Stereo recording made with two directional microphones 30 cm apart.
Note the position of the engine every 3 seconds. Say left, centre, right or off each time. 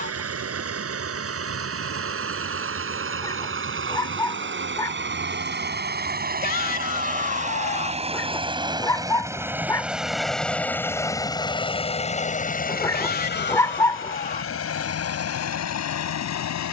right, right, right, centre, left, left.